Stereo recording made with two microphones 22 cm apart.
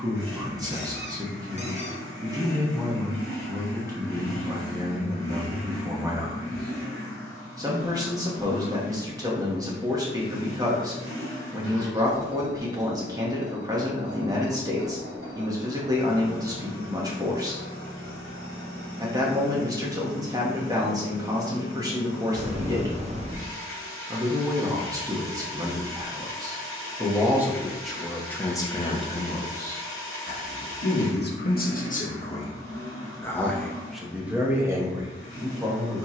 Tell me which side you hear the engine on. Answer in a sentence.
In this clip you hear the engine on the right.